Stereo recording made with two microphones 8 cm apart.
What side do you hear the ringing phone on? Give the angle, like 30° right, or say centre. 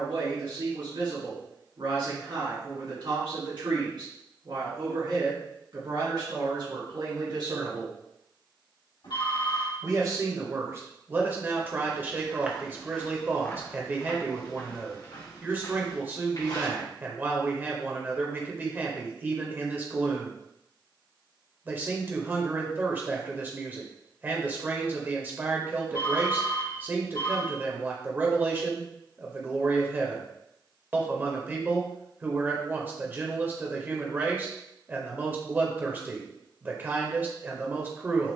70° left.